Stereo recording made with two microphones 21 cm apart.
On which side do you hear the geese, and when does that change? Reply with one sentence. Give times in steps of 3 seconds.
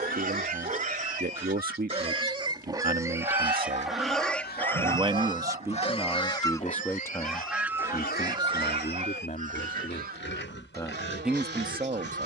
You can hear the geese on the left from 0 s, in the centre from 6 s and on the right from 9 s.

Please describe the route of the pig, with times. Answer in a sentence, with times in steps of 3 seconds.
You can hear the pig on the right from 0 s, in the centre from 3 s and on the left from 6 s.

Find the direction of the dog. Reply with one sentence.
In this clip you hear the dog on the right.